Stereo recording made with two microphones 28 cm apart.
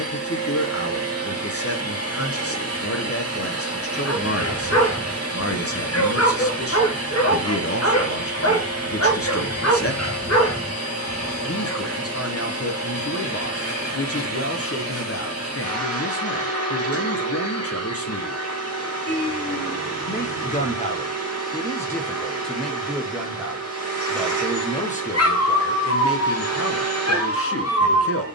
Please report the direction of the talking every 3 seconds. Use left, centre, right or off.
left, left, left, left, left, left, left, centre, left, left.